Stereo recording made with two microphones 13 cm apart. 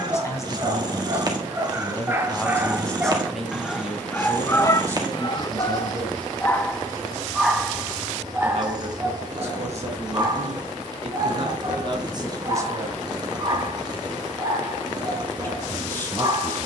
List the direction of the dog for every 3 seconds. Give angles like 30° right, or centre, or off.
20° right, 20° left, centre, 30° right, 30° right, 30° right.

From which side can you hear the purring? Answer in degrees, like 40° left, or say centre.
30° right.